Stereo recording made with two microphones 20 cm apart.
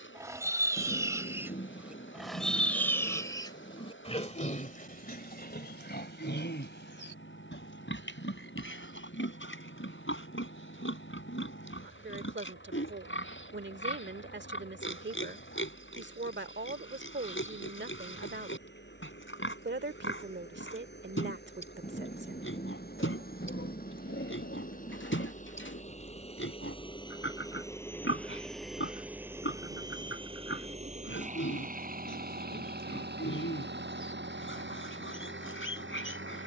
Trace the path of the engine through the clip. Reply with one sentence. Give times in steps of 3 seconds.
In this clip you hear the engine on the left from 0 s, in the centre from 27 s and on the right from 30 s.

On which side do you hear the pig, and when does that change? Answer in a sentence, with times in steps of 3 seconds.
In this clip you hear the pig in the centre from 0 s and on the left from 3 s.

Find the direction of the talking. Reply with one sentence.
In this clip you hear the talking on the right.